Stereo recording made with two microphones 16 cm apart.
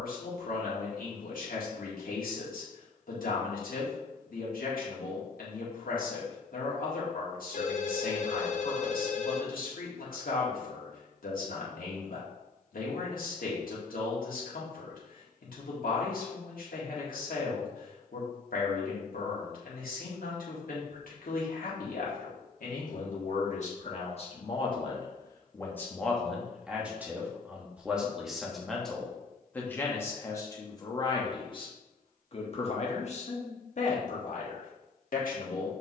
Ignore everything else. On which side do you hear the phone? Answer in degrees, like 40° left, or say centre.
50° left.